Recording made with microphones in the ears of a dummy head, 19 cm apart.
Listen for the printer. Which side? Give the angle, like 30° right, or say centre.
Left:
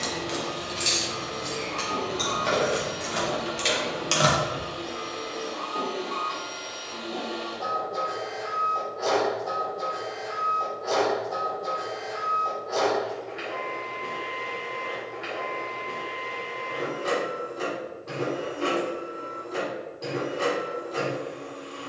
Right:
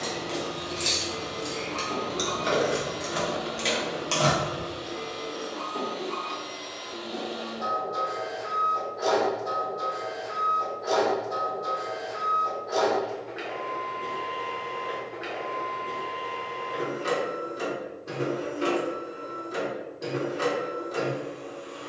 20° right.